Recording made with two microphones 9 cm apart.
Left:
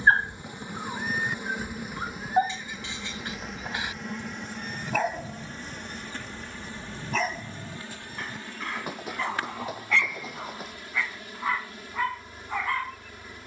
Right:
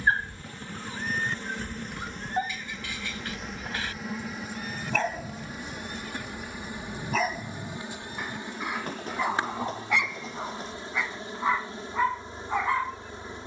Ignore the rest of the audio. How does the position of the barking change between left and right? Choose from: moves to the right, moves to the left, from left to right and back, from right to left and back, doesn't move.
moves to the right.